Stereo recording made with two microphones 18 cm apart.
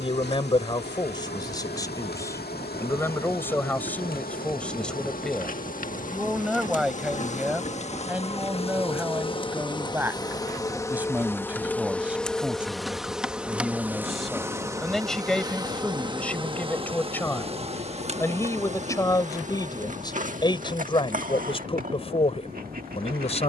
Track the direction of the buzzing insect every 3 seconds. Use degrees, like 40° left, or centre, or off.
60° left, 50° left, 40° left, 20° left, 10° right, 30° right, 40° right, 50° right.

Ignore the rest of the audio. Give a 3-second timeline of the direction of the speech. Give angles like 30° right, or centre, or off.
20° left, 10° left, 10° right, 10° right, centre, 10° left, 20° left, 30° left.